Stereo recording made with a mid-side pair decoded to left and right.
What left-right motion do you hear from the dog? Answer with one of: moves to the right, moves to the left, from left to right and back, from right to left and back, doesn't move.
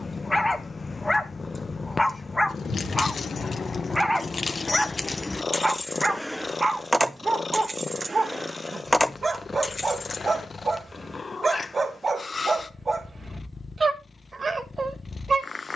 moves to the right.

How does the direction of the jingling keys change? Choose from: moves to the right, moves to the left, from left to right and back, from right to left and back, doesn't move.
from left to right and back.